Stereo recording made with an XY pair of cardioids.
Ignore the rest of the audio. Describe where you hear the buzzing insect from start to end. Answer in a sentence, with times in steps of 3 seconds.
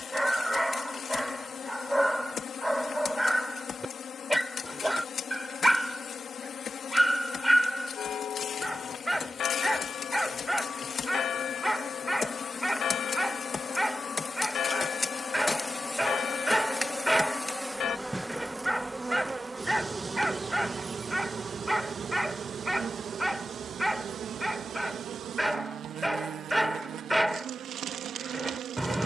You can hear the buzzing insect on the left from 0 s, in the centre from 15 s and on the right from 18 s.